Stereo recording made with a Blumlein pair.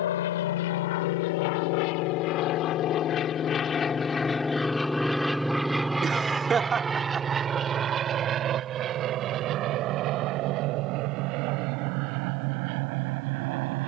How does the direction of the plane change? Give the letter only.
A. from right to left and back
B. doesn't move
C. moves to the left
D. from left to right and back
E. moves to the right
E.